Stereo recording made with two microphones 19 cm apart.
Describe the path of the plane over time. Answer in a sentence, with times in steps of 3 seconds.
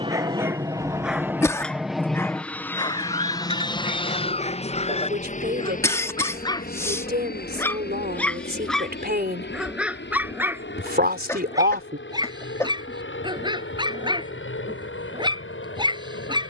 You can hear the plane in the centre from 0 s and on the left from 3 s.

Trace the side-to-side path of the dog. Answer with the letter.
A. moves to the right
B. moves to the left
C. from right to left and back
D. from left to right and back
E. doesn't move
C.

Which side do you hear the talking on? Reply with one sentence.
In this clip you hear the talking on the right.